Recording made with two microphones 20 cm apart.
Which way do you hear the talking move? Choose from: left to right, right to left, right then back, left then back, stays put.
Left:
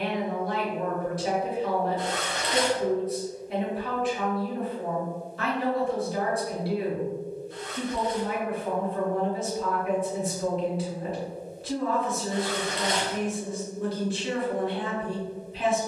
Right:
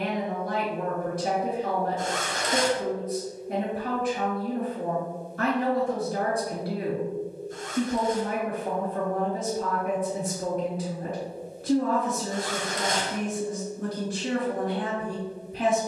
stays put.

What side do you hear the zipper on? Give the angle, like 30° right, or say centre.
50° right.